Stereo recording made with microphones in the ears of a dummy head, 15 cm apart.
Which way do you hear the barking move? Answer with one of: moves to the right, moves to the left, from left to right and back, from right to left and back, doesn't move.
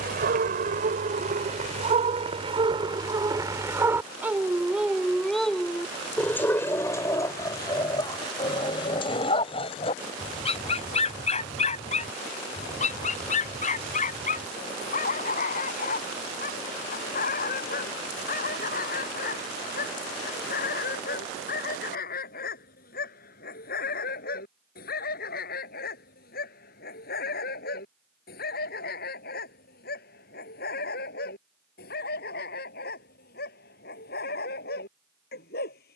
moves to the left.